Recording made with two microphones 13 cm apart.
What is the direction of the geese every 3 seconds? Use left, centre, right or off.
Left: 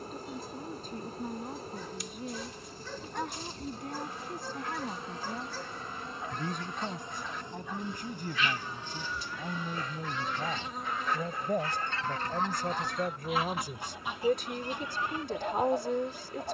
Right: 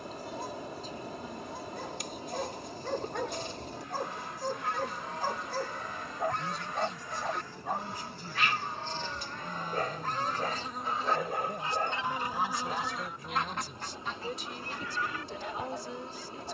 right, right, right, right, centre, left.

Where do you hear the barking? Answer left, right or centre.
right.